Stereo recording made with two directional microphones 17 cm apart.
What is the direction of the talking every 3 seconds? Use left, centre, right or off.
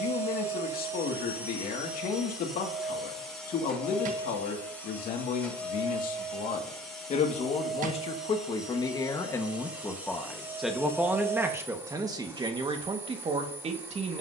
left, left, left, centre, right.